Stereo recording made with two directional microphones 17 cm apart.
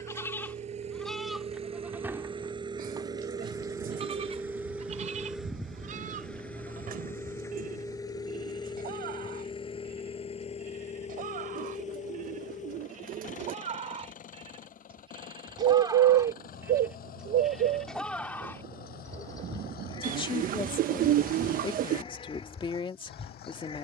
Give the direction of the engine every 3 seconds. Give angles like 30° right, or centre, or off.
40° right, 10° right, 20° left, 40° left, 50° left, 60° left, 60° left, 70° left.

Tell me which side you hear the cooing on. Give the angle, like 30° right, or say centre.
60° right.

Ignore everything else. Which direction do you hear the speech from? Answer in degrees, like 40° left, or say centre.
30° left.